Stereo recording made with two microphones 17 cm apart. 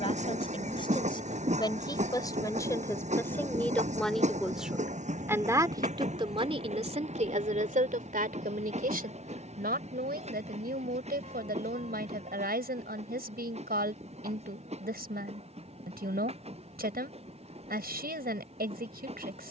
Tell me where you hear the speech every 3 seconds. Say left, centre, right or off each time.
left, centre, right, right, right, right, right.